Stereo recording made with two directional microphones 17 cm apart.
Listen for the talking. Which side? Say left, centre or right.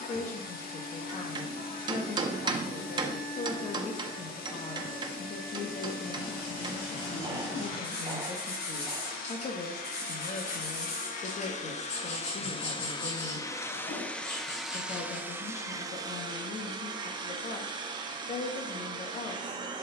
left.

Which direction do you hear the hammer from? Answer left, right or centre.
right.